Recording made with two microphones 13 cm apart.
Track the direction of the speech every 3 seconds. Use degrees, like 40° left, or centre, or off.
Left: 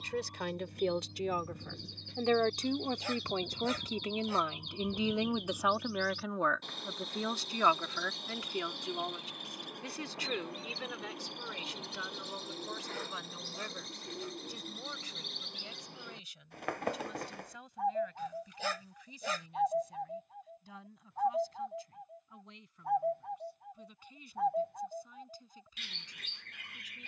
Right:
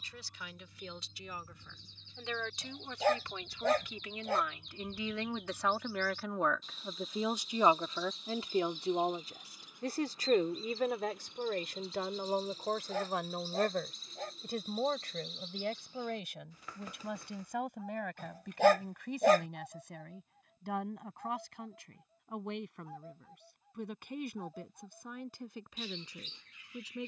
60° left, 30° left, 20° right, 50° right, 60° right, 70° right, 70° right, 70° right, 70° right.